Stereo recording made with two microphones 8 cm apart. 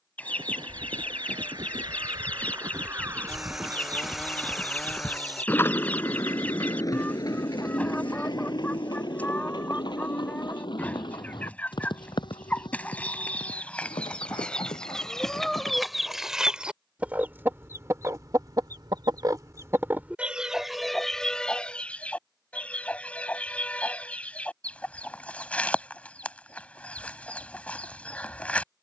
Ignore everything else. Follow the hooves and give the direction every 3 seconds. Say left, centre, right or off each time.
right, centre, left, left, left, left, off, off, off, off.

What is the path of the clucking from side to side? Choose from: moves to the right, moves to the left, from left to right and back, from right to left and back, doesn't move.
from left to right and back.